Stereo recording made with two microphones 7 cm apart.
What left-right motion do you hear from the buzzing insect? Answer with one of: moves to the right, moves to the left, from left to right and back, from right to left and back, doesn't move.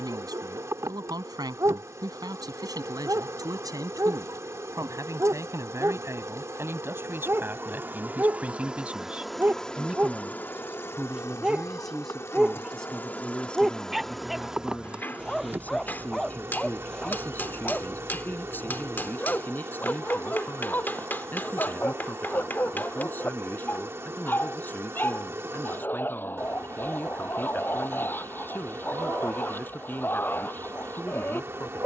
from right to left and back.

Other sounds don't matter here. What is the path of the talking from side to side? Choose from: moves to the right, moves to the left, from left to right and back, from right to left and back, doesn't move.
moves to the left.